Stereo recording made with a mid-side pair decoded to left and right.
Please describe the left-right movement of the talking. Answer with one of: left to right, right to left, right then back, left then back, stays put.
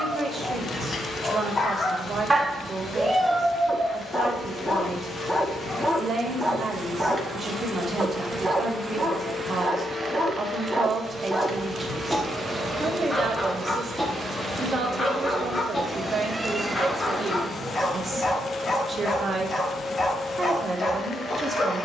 stays put.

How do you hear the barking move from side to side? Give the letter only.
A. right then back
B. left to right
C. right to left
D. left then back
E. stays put
A.